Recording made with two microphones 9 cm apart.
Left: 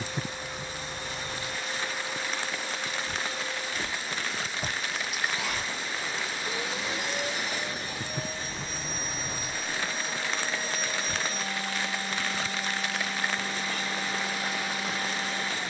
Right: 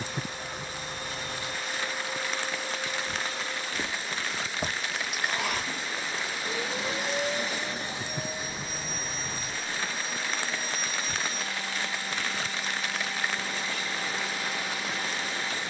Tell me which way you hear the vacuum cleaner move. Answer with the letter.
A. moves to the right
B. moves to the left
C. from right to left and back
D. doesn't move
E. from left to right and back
B.